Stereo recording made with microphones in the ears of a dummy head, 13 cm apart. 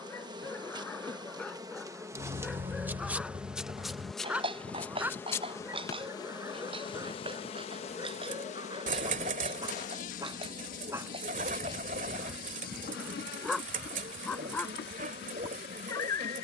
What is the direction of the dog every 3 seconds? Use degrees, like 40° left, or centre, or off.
10° left, 10° right, 20° right, 20° right, centre, 20° left.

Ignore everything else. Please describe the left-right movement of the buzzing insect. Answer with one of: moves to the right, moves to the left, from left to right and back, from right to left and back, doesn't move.
moves to the left.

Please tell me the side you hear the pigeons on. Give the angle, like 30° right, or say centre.
50° right.